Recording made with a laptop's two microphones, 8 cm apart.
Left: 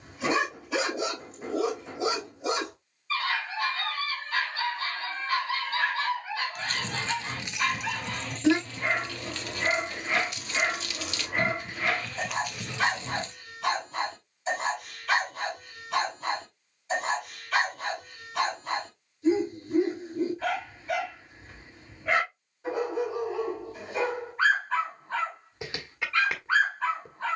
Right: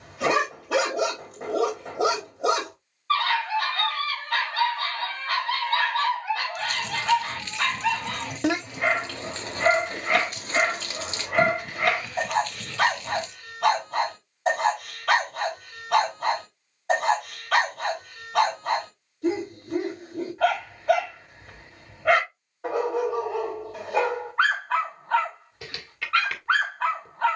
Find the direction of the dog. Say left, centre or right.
right.